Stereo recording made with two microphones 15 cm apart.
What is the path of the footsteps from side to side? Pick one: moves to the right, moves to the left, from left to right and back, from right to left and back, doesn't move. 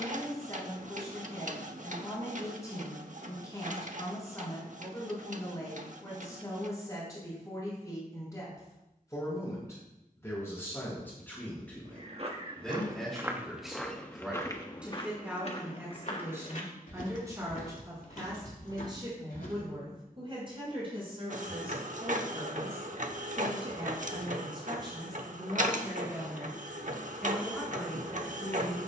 moves to the left.